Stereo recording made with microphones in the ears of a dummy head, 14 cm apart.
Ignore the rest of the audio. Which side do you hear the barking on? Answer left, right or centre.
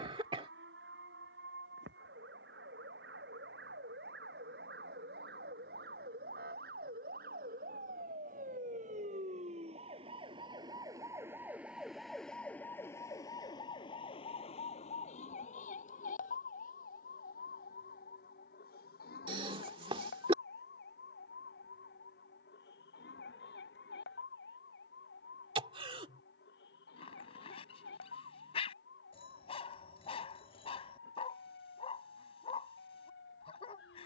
left.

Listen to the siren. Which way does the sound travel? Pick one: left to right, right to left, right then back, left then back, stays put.
right to left.